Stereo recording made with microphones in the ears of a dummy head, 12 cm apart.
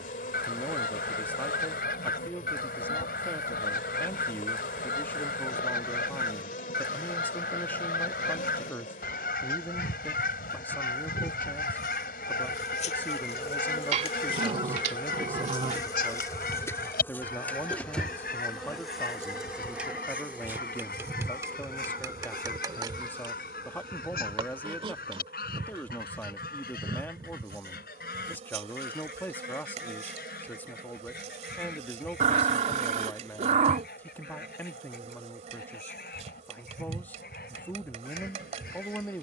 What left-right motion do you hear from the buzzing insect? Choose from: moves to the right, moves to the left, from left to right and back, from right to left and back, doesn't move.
moves to the right.